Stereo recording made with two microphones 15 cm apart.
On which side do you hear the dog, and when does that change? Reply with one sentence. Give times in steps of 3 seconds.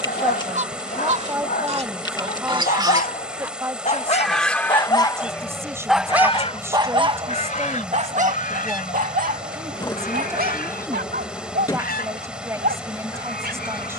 You can hear the dog on the left from 0 s and on the right from 6 s.